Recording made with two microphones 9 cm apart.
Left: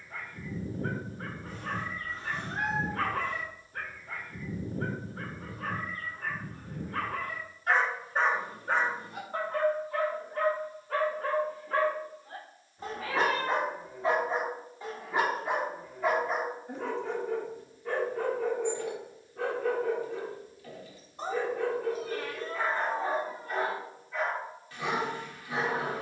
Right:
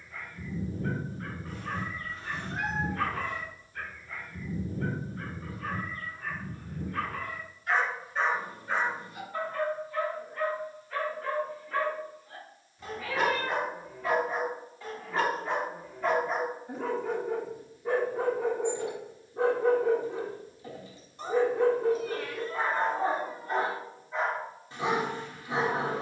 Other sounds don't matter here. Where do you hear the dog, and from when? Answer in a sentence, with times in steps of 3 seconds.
In this clip you hear the dog on the left from 0 s, in the centre from 15 s and on the right from 18 s.